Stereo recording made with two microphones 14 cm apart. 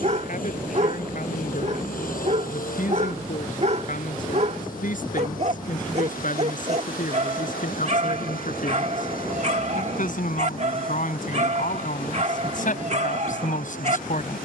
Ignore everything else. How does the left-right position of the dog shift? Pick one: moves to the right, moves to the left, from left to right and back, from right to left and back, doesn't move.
doesn't move.